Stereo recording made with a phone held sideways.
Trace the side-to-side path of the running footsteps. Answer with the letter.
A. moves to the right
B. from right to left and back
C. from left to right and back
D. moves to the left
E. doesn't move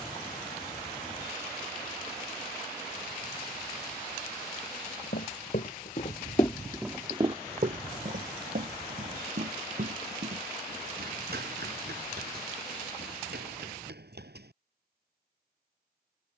A.